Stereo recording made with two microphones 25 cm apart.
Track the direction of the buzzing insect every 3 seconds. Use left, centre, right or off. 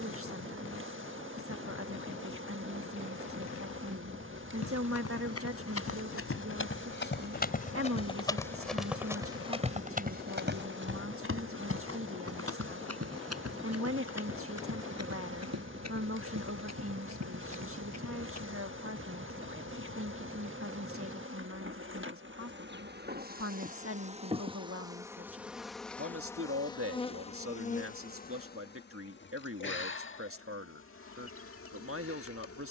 right, right, right, right, right, right, right, right, centre, left, left.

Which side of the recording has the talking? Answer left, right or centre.
right.